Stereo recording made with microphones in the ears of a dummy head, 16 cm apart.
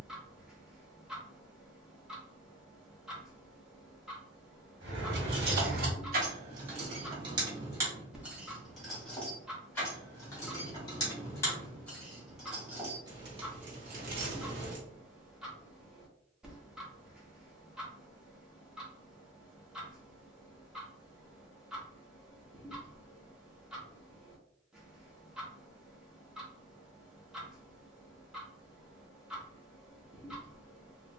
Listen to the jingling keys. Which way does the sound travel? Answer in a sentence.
In this clip you hear the jingling keys go left and come back.